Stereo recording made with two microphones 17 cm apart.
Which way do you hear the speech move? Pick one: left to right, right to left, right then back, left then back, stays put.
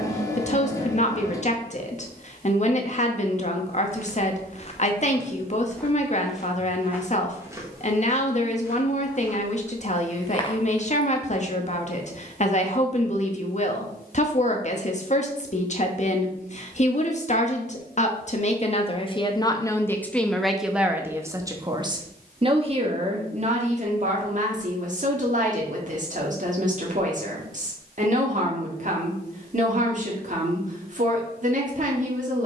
left to right.